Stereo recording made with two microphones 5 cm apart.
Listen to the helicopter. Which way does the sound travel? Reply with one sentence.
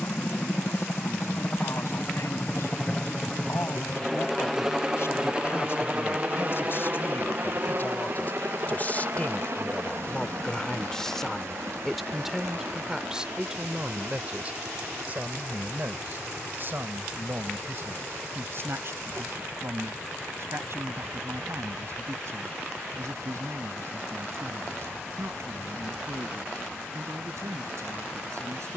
In this clip you hear the helicopter move to the right.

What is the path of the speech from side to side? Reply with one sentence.
You can hear the speech move to the right.